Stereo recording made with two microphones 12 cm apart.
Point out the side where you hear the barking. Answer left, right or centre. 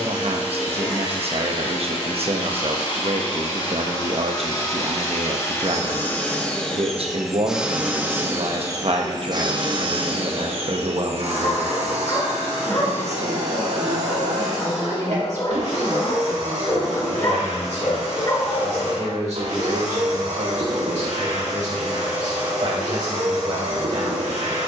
left.